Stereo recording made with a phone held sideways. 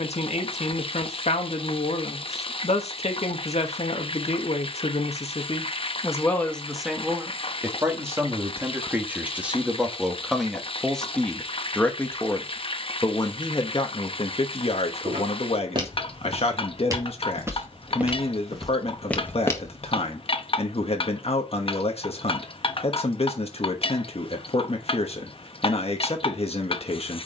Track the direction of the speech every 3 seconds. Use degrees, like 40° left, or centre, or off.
50° left, 50° left, 10° right, centre, 30° left, 50° left, 50° left, 50° left, 50° left.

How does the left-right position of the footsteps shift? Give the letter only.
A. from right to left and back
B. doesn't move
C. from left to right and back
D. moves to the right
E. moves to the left
E.